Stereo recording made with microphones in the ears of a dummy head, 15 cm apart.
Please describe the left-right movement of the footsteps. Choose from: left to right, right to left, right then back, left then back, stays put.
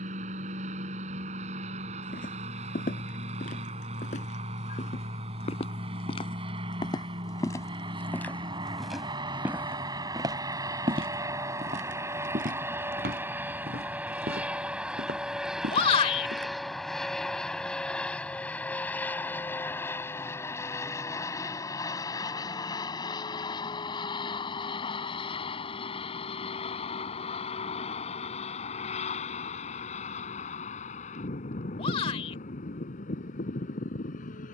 left to right.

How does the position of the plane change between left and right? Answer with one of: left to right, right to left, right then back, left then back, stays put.
right to left.